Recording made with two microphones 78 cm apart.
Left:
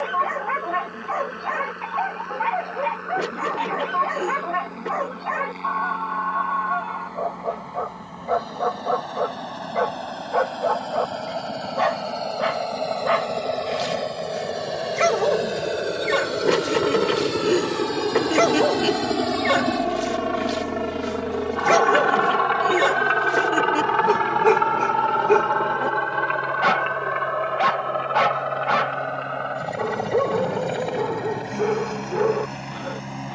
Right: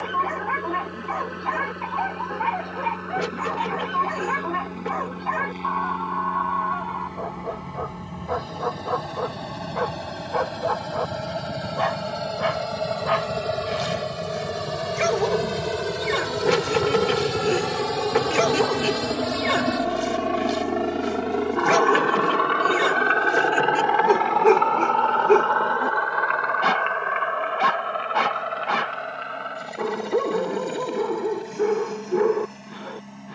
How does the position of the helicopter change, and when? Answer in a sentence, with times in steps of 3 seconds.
You can hear the helicopter on the right from 0 s, in the centre from 18 s and on the left from 21 s.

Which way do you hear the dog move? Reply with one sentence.
You can hear the dog stay put.